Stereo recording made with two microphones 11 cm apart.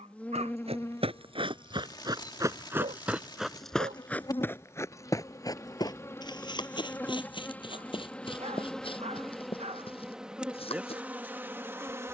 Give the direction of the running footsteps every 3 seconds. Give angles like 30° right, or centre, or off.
40° right, 20° left, 50° left, 50° left.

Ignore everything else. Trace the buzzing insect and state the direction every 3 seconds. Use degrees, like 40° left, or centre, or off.
30° left, 30° left, 10° left, 10° right.